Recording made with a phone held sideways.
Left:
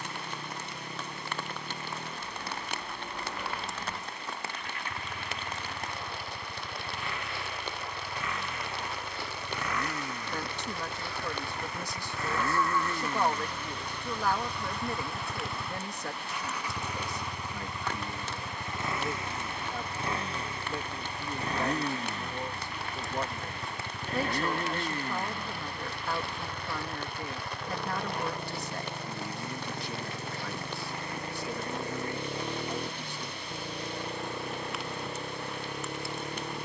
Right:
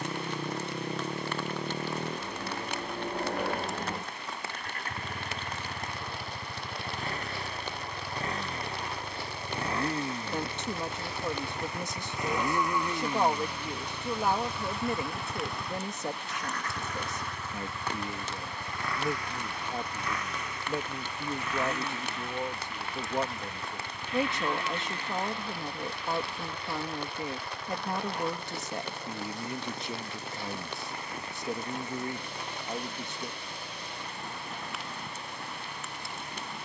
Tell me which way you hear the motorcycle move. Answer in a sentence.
In this clip you hear the motorcycle travel towards the left.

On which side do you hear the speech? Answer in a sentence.
In this clip you hear the speech on the right.